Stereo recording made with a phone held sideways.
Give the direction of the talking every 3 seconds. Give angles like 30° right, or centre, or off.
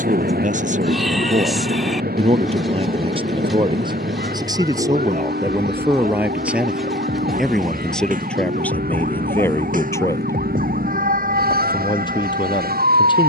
50° right, 20° right, centre, 20° left, 30° left.